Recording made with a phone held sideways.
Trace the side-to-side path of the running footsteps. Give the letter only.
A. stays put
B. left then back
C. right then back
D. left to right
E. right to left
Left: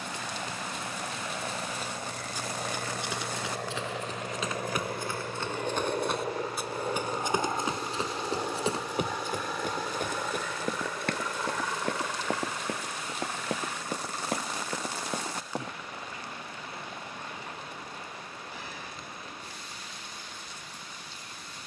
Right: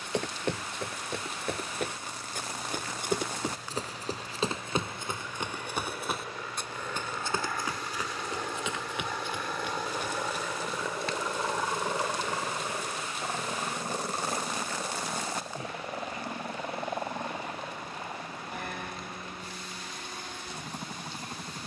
E.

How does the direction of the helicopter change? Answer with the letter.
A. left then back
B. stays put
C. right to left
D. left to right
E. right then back
D.